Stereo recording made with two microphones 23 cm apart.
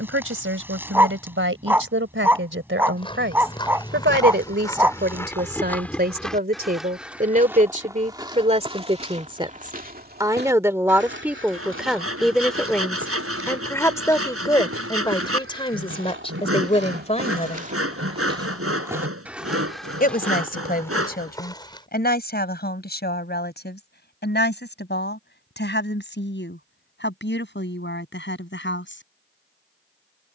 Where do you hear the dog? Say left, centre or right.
centre.